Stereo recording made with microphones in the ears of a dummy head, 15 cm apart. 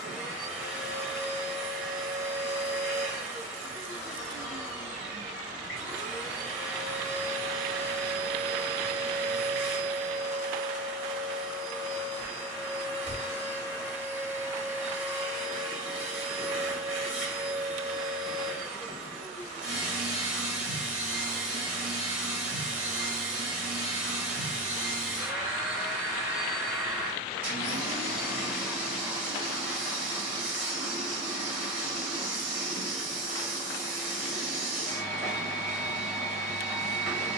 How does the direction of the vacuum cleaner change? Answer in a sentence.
In this clip you hear the vacuum cleaner stay in one place.